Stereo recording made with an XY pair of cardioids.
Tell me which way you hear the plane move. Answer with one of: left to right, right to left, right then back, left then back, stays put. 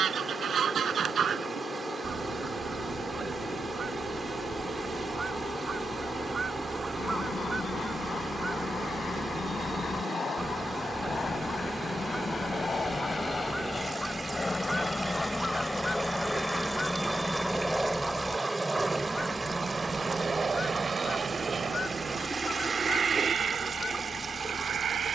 left to right.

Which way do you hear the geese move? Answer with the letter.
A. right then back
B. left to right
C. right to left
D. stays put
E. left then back
C.